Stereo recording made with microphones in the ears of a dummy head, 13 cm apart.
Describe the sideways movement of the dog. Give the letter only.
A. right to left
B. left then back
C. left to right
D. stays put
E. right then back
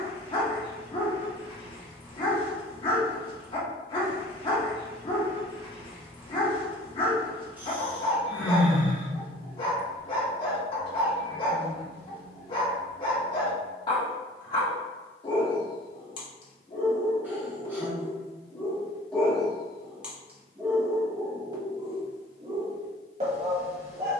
C.